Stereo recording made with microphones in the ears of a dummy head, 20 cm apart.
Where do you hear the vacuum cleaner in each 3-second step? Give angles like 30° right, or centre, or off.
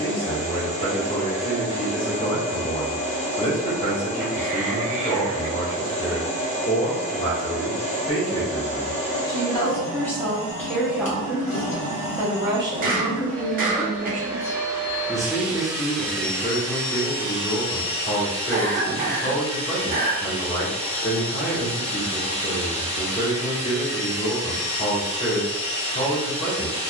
30° left, 30° left, 30° left, 30° left, 10° left, 10° left, 30° left, 30° left, 30° left.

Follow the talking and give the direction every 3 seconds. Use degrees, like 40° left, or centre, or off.
30° left, 30° left, 20° left, 10° left, 30° right, 20° left, 20° left, 20° left, 20° left.